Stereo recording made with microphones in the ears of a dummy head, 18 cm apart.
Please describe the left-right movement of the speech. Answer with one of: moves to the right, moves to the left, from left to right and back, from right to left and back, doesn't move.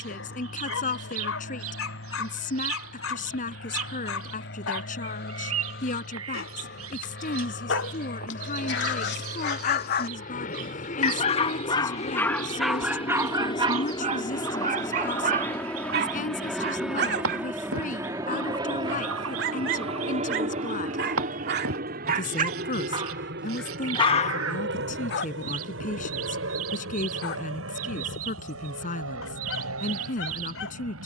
doesn't move.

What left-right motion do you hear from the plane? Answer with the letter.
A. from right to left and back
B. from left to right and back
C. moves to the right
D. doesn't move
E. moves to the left
C.